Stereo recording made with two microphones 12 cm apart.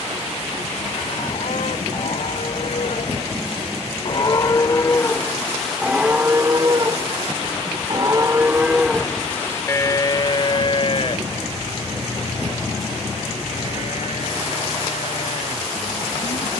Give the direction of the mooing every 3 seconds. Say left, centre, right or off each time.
left, left, right, left, left, left.